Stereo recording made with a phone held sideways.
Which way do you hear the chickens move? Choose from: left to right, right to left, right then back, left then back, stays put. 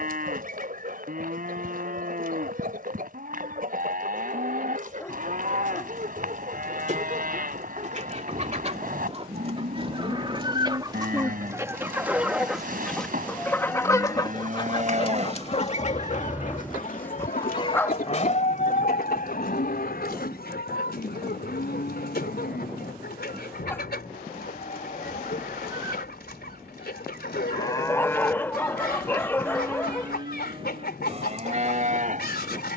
right to left.